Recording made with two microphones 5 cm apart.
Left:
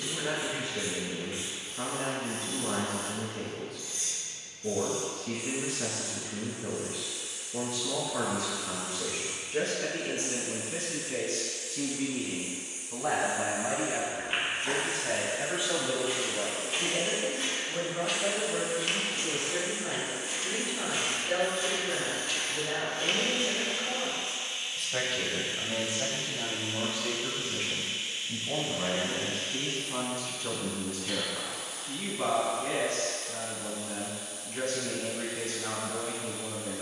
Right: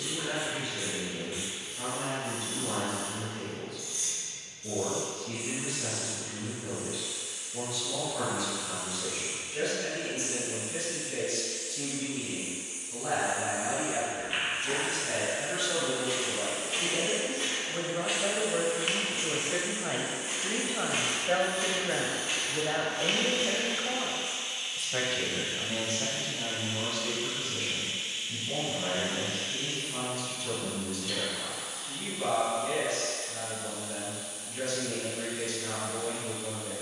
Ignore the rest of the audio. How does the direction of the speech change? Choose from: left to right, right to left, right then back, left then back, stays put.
right then back.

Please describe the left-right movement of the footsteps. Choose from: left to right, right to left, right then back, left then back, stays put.
right then back.